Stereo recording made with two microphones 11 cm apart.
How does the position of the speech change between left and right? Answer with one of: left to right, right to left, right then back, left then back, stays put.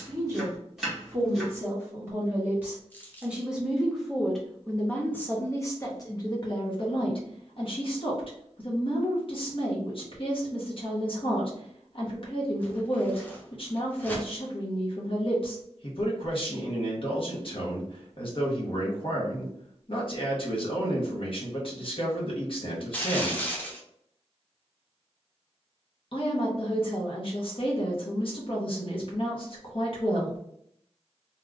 right to left.